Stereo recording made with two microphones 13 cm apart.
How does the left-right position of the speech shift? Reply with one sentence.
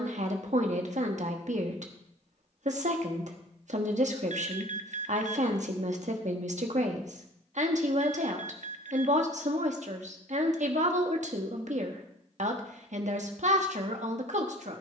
In this clip you hear the speech stay in one place.